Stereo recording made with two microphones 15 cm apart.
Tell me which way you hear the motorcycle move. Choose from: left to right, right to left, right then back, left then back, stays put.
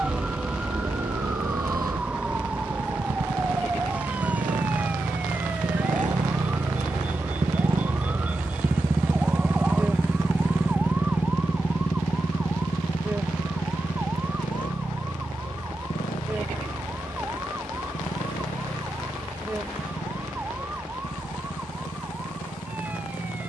right to left.